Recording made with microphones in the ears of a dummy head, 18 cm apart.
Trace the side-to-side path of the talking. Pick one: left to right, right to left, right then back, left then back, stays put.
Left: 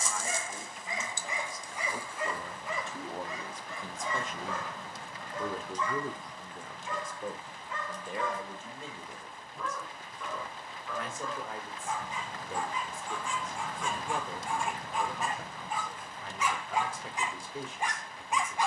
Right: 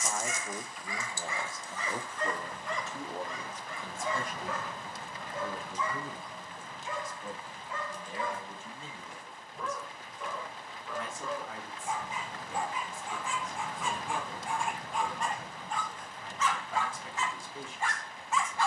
right to left.